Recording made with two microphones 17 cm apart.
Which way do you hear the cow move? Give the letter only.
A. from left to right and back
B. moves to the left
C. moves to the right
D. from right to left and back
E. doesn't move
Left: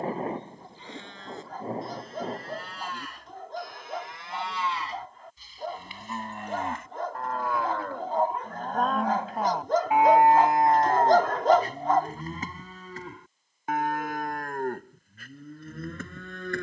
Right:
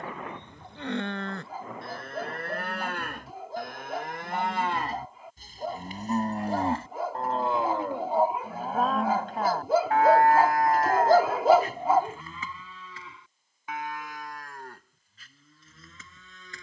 B.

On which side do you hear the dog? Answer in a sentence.
In this clip you hear the dog in the centre.